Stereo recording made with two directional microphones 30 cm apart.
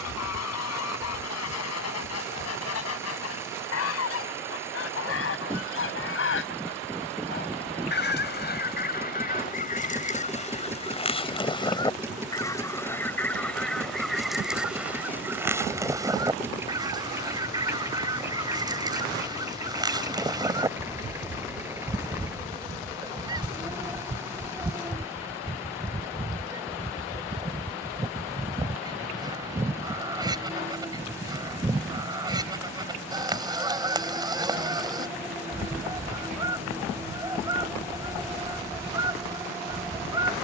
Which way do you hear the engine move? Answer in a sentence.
You can hear the engine stay in one place.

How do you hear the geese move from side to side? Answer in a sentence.
In this clip you hear the geese go from the left side to the right.